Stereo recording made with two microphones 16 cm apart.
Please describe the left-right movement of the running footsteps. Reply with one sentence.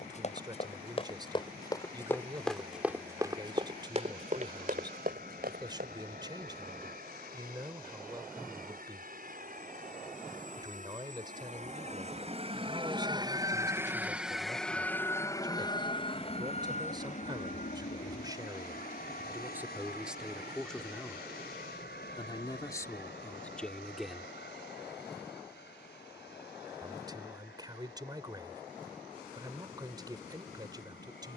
You can hear the running footsteps move to the right.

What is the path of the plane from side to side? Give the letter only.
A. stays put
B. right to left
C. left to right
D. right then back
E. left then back
B.